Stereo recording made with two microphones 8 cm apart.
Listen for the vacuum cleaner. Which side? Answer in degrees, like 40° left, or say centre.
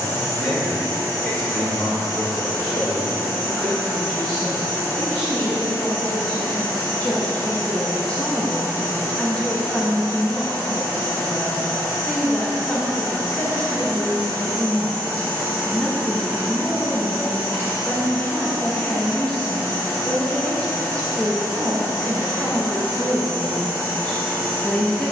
30° left.